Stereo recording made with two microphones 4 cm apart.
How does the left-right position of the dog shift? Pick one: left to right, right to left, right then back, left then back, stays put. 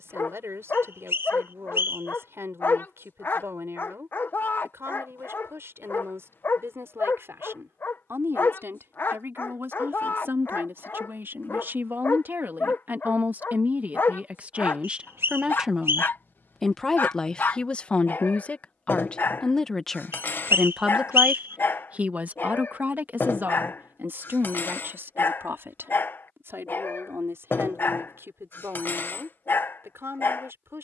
stays put.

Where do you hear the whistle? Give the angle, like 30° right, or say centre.
70° right.